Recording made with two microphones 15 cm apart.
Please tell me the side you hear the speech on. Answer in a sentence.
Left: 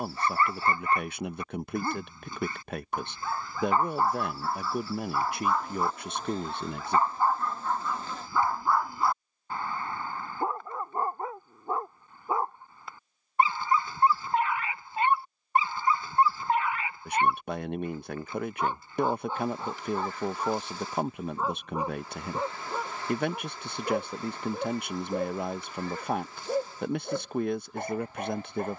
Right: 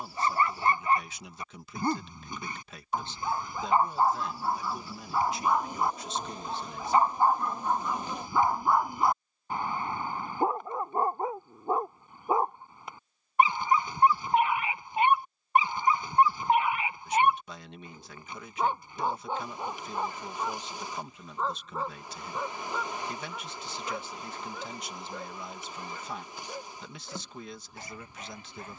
In this clip you hear the speech on the left.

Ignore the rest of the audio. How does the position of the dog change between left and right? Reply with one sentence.
You can hear the dog move to the left.